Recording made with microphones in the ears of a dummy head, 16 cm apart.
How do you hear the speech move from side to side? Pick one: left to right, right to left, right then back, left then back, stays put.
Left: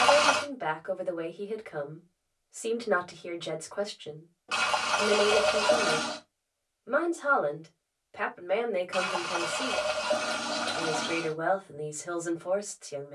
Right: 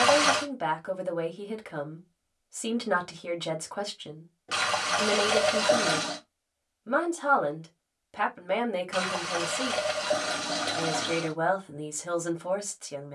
stays put.